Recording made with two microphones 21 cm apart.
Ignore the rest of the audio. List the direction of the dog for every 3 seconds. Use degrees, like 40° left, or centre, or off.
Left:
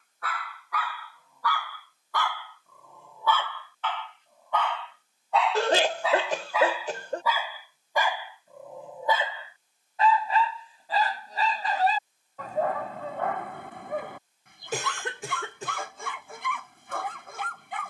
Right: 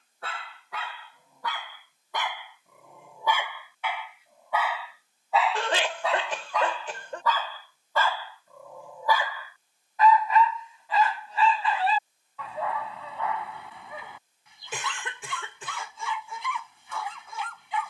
20° right, 10° right, 10° left, 30° left, 50° left, 50° left.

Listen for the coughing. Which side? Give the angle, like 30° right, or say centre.
40° left.